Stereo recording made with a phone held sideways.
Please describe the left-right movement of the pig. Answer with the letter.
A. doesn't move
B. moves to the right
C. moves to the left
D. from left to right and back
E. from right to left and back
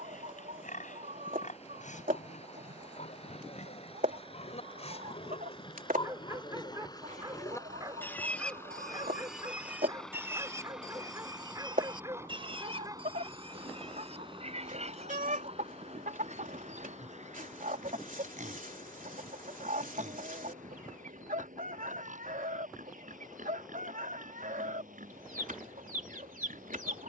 B.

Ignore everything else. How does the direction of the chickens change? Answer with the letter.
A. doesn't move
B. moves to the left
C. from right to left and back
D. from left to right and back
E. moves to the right
A.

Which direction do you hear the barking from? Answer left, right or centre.
right.